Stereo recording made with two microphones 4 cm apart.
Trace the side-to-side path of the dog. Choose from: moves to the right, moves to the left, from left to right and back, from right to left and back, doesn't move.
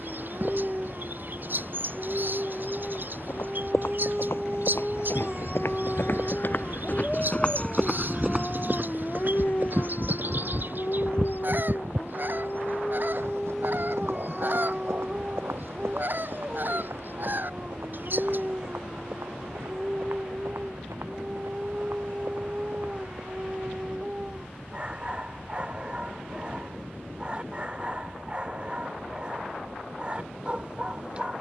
from right to left and back.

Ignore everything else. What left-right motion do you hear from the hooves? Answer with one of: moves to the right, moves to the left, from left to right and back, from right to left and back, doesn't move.
moves to the right.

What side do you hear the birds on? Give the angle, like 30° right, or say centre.
50° right.